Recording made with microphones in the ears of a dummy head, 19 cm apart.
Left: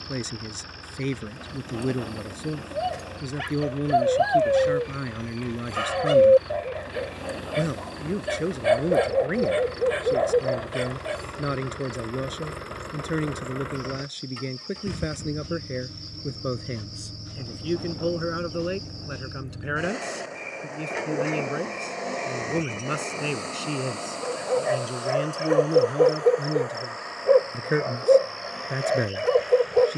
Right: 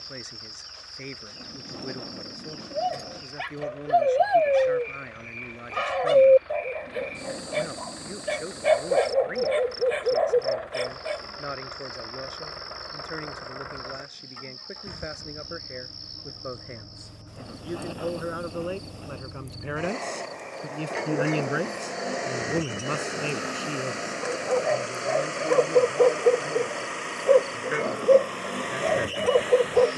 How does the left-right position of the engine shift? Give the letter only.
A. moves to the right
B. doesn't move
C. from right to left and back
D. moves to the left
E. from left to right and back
A.